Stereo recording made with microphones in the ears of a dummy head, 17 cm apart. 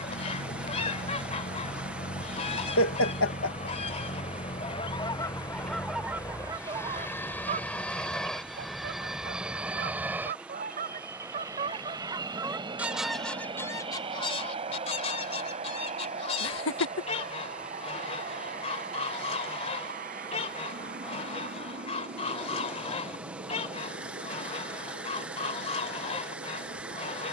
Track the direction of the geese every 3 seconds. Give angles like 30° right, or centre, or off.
30° left, 20° left, 20° right, 40° right, 10° left, 30° left, 30° left, 30° left, 30° left.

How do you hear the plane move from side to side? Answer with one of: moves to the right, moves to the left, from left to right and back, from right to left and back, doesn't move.
moves to the right.